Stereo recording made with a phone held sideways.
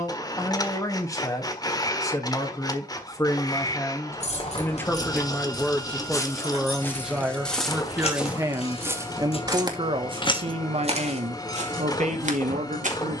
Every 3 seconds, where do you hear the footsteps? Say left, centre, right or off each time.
off, left, centre, right, right.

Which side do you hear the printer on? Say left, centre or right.
left.